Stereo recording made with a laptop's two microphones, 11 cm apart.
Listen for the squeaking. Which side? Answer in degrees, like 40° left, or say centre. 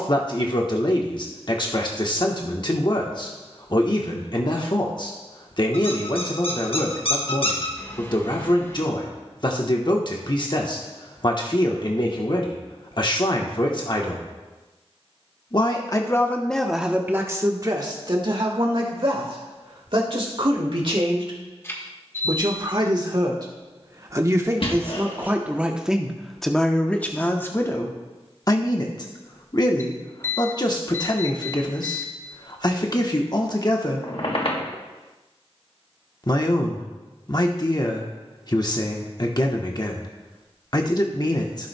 60° left.